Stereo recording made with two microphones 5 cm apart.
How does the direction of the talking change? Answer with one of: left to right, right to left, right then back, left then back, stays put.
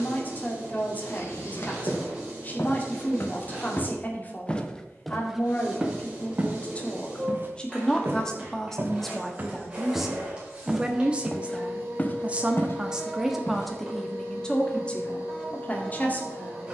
right then back.